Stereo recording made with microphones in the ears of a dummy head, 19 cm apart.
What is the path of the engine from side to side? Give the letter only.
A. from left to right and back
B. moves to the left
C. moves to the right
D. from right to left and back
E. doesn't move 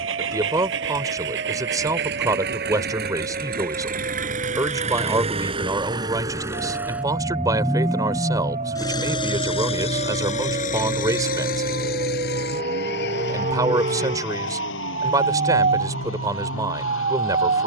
B.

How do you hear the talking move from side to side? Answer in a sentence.
You can hear the talking stay put.